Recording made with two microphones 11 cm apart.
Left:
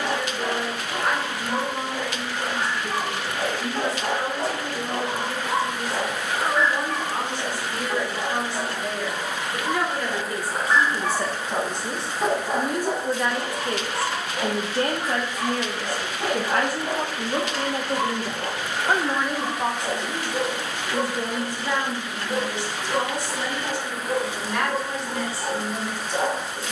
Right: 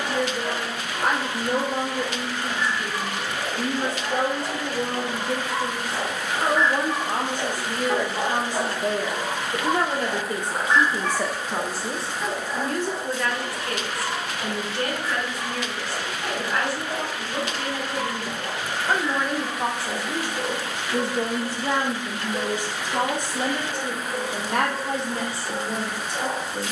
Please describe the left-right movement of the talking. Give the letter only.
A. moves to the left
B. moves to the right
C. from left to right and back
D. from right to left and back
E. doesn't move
D.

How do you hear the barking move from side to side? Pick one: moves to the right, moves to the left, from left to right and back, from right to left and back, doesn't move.
from left to right and back.